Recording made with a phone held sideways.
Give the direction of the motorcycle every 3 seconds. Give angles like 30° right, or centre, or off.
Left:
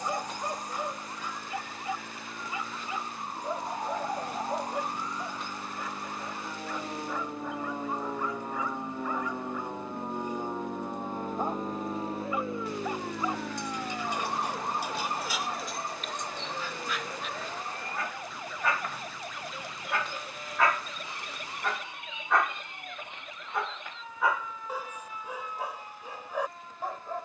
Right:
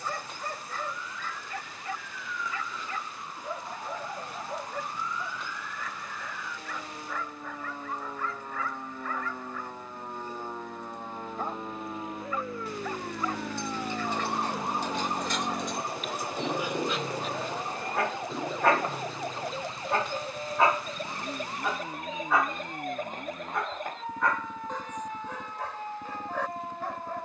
80° left, 80° left, 70° left, 60° left, centre, 60° right, 70° right, 80° right, 80° right.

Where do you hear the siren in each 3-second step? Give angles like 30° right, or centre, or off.
50° left, 40° left, 30° left, 20° left, centre, 10° right, 30° right, 40° right, 50° right.